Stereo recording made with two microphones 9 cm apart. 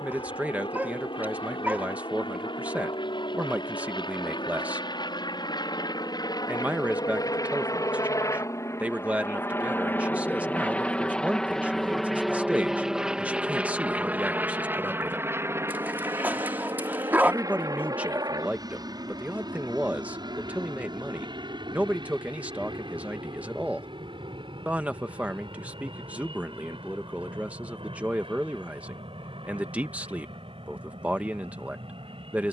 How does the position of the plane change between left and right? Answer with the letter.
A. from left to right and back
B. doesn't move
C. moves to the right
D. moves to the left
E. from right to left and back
C.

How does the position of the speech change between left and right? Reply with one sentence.
You can hear the speech stay in one place.